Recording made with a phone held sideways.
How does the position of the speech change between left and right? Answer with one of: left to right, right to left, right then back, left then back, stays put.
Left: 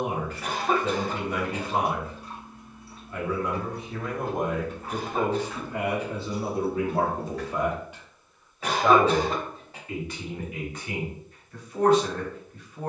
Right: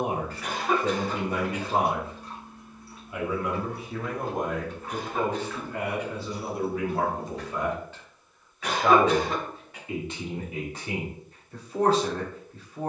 left then back.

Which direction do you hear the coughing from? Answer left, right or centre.
left.